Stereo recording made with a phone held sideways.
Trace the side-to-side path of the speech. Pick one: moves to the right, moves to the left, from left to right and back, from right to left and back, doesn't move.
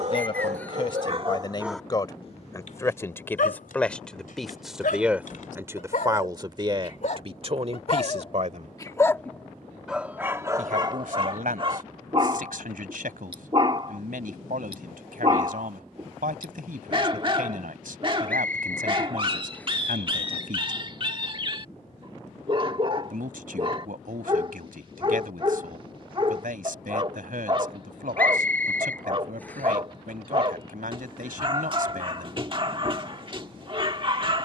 moves to the right.